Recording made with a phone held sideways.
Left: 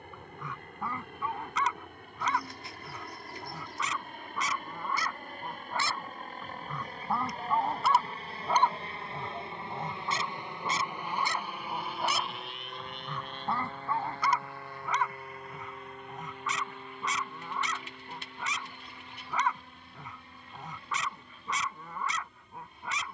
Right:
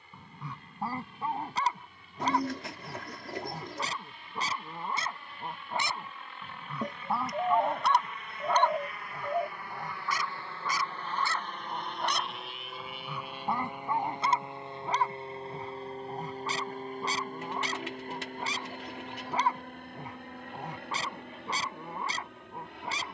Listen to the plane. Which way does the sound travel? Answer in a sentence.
You can hear the plane travel towards the right.